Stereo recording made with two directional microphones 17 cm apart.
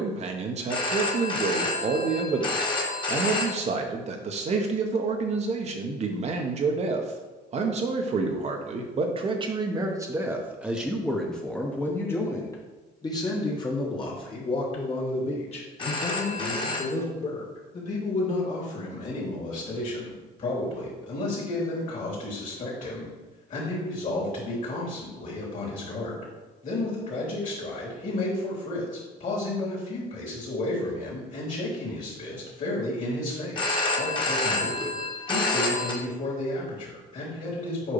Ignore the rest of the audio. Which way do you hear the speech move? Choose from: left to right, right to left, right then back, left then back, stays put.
right to left.